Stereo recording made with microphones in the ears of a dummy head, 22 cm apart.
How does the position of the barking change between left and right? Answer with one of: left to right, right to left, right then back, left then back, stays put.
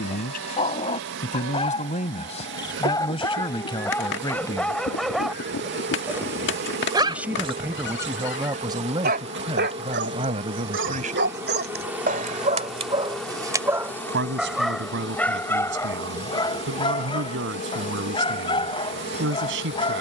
right then back.